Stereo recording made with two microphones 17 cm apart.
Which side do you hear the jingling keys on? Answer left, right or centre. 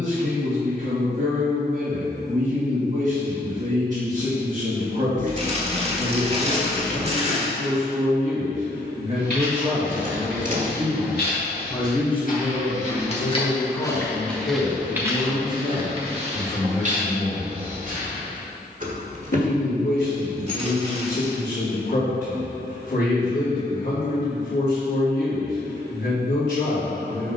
right.